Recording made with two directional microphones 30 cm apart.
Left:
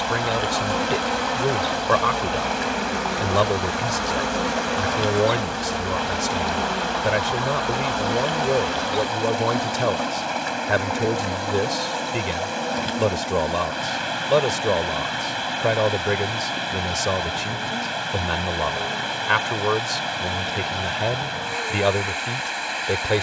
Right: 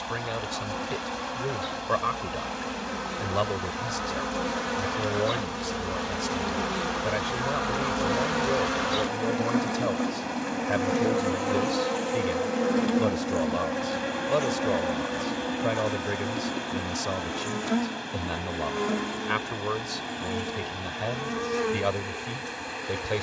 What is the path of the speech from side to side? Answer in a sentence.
You can hear the speech stay in one place.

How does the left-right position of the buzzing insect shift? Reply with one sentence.
You can hear the buzzing insect move to the right.